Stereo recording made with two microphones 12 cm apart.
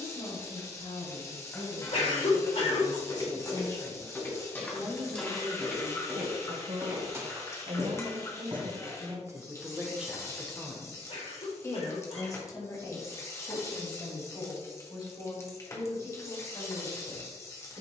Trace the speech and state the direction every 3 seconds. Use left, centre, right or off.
left, centre, right, centre, left, left.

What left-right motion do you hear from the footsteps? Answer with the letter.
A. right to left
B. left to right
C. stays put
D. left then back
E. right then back
B.